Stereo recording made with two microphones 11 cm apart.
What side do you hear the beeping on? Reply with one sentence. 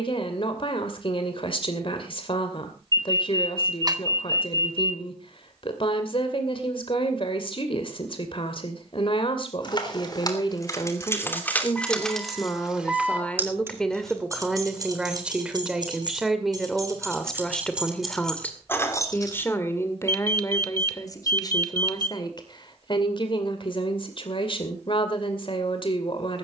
In this clip you hear the beeping on the right.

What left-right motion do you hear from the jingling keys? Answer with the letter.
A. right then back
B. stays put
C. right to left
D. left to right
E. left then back
A.